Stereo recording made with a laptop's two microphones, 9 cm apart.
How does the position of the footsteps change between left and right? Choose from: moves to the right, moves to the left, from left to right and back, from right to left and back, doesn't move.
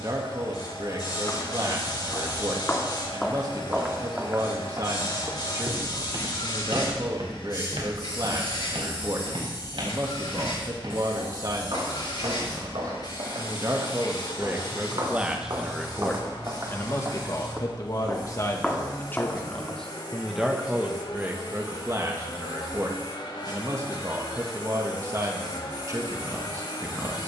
from left to right and back.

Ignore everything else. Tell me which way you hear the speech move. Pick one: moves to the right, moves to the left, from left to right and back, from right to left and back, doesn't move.
from right to left and back.